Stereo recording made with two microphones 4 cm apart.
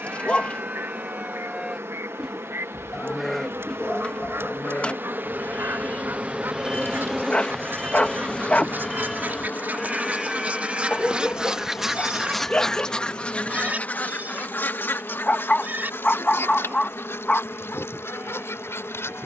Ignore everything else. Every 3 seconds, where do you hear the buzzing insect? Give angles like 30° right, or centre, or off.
70° right, 50° right, centre, 50° left, 60° left, 60° left, 60° left.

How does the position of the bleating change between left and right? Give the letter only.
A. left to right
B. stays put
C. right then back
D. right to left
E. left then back
E.